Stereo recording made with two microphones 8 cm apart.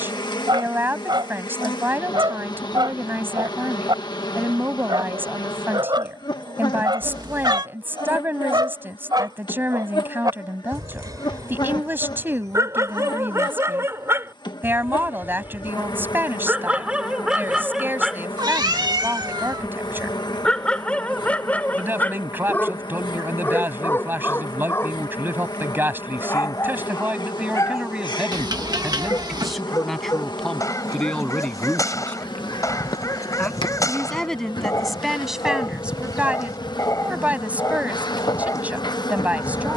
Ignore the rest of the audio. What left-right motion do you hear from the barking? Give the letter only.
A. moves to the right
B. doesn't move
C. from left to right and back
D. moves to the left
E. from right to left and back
D.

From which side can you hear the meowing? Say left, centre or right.
right.